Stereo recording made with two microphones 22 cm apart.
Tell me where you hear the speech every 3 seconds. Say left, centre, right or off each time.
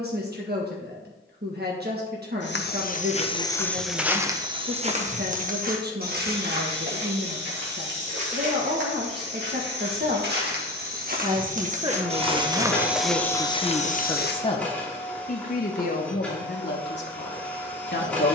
right, right, right, right, centre, left.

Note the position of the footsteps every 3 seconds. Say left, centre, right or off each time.
left, centre, right, right, centre, off.